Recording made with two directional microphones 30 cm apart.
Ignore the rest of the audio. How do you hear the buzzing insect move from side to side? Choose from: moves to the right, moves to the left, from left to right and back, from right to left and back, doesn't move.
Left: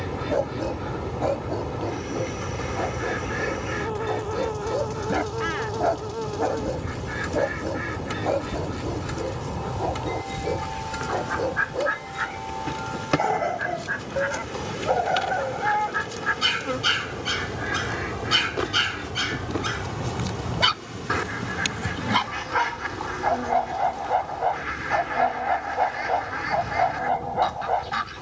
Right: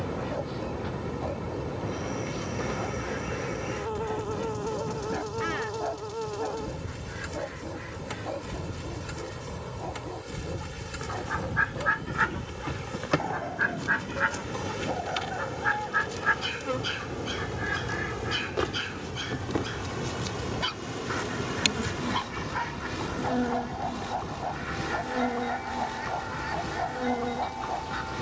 moves to the right.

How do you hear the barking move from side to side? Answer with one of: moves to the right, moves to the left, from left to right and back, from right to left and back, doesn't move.
doesn't move.